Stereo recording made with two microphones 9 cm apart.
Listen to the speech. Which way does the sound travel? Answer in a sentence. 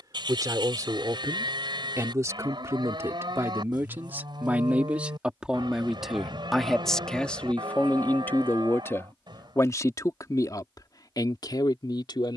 You can hear the speech move to the left.